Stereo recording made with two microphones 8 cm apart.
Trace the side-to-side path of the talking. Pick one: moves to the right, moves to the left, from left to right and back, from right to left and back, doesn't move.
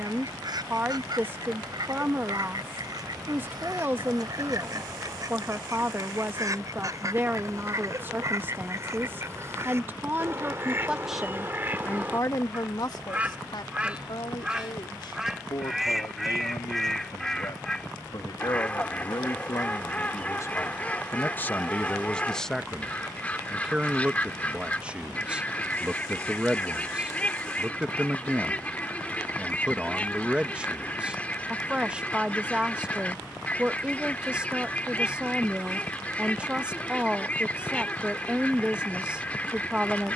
from right to left and back.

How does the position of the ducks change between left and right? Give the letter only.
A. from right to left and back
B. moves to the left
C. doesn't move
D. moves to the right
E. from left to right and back
B.